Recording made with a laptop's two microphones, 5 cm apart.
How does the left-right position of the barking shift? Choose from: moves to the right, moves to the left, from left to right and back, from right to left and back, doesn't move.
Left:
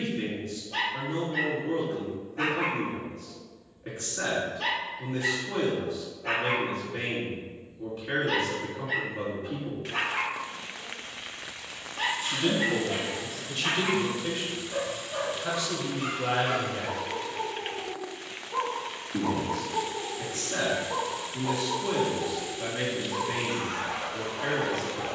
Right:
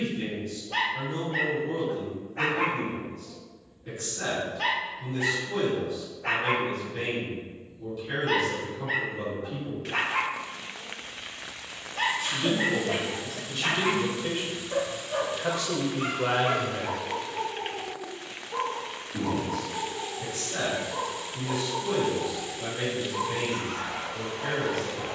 moves to the left.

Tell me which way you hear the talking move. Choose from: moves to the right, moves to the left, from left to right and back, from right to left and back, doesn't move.
from left to right and back.